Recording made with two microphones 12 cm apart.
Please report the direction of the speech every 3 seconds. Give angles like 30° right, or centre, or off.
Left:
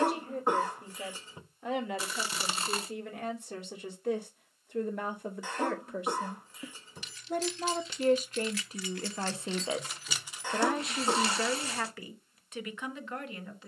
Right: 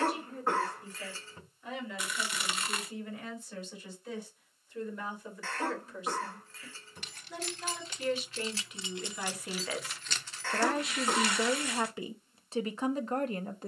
70° left, 60° left, 50° left, 10° left, 40° right.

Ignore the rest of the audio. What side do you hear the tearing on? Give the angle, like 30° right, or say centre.
30° left.